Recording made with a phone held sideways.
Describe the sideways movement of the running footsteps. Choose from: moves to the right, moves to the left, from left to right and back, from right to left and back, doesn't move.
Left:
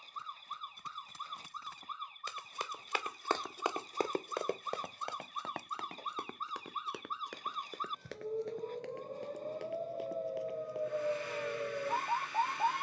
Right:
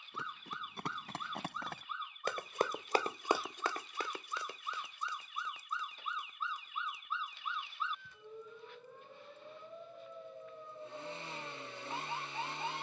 moves to the left.